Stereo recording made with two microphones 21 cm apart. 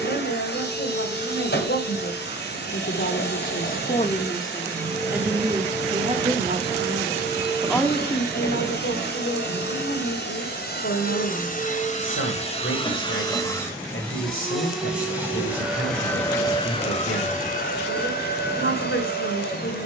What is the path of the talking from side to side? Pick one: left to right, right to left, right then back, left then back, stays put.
right then back.